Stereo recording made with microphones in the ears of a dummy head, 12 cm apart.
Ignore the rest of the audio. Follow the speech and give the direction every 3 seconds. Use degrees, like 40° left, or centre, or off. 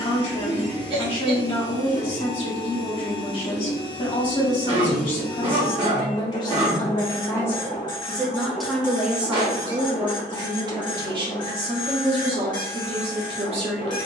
40° left, 40° left, 20° left, 30° right, 50° right.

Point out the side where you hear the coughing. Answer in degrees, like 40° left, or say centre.
40° right.